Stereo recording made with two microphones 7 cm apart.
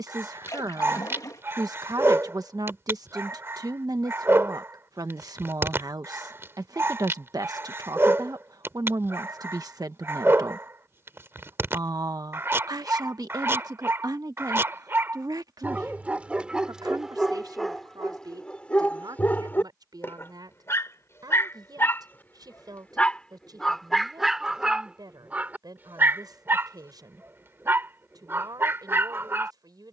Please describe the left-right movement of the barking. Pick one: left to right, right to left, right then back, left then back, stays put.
left then back.